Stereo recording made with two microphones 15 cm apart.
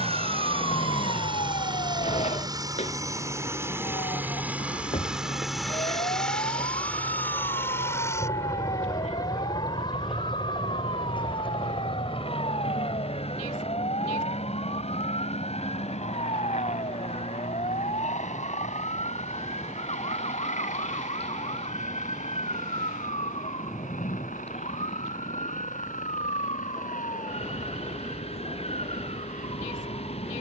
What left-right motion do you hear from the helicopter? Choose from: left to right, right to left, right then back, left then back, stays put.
right to left.